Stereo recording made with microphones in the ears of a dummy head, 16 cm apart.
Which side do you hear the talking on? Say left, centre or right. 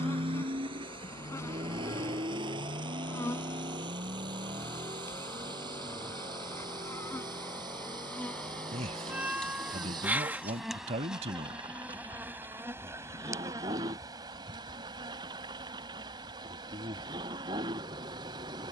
right.